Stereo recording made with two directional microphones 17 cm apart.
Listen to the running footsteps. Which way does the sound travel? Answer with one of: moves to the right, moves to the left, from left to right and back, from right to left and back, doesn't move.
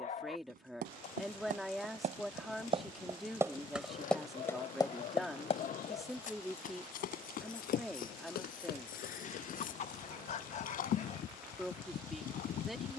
moves to the left.